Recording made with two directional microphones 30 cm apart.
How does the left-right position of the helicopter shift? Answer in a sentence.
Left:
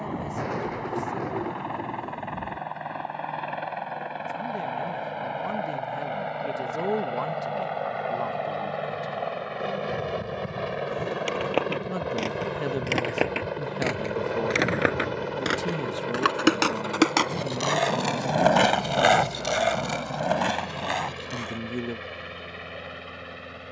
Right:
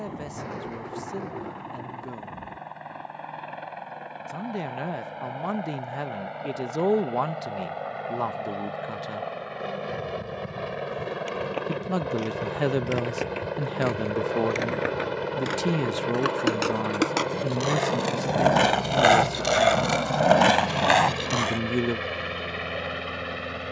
You can hear the helicopter move from left to right.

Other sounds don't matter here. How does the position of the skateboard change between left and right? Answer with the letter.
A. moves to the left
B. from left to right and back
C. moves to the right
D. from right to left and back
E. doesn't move
C.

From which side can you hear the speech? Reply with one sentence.
In this clip you hear the speech on the right.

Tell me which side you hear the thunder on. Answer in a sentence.
You can hear the thunder on the left.